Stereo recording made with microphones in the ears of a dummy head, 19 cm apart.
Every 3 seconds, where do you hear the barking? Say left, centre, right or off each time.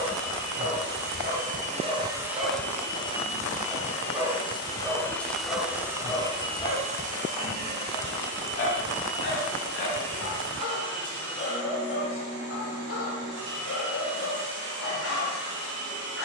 right, centre, left, left, left, left.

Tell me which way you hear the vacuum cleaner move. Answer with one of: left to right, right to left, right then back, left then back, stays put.
left then back.